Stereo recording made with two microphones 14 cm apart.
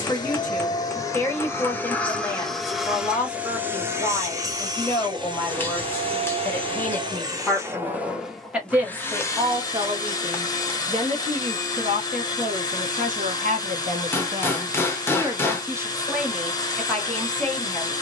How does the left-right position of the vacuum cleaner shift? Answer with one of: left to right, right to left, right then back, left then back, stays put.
right then back.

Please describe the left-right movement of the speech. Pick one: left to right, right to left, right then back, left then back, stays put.
right then back.